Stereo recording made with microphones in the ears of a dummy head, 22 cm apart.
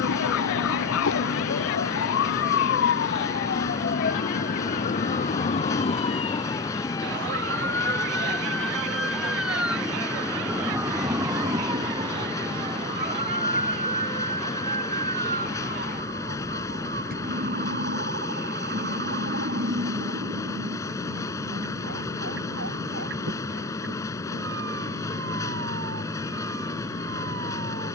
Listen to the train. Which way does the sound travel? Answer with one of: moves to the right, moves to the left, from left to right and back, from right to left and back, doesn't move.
doesn't move.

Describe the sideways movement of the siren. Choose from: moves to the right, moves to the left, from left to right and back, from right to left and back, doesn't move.
moves to the right.